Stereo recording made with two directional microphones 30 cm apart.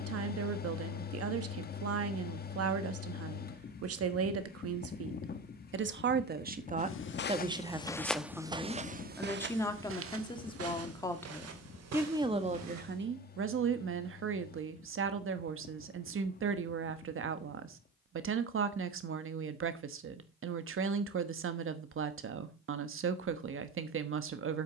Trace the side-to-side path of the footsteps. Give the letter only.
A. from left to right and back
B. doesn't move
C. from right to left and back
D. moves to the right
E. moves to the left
D.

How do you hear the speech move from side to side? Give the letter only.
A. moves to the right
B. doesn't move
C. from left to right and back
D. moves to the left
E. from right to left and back
E.